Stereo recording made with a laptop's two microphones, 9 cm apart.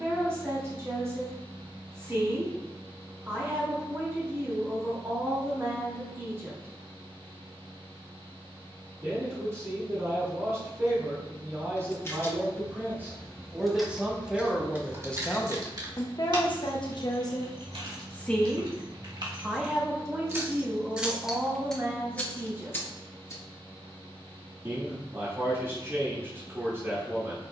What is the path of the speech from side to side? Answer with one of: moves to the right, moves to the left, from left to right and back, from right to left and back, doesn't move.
from right to left and back.